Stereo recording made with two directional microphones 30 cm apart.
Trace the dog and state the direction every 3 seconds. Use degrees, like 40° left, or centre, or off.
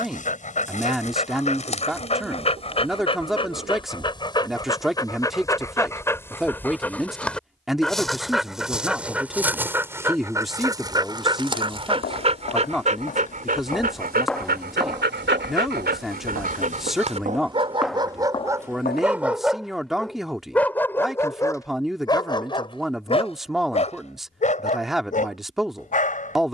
20° left, 10° left, centre, 10° right, 30° right, 30° right, centre, 20° left, 30° left.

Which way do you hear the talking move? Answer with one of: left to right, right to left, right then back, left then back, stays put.
stays put.